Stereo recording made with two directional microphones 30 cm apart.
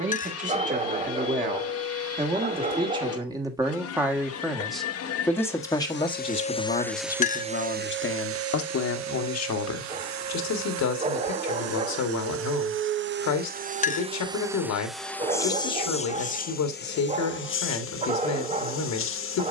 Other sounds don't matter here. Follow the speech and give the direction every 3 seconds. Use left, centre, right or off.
right, centre, left, left, left, left, left.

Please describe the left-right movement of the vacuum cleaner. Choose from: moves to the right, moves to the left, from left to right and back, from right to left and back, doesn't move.
from left to right and back.